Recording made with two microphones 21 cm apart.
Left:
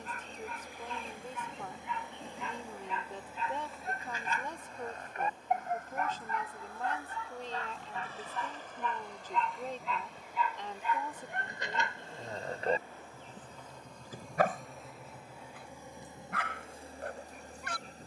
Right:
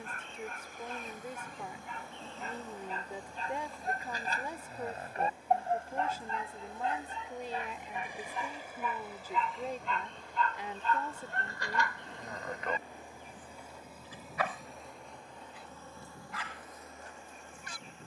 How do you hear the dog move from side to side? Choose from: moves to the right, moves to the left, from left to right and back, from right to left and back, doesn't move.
moves to the left.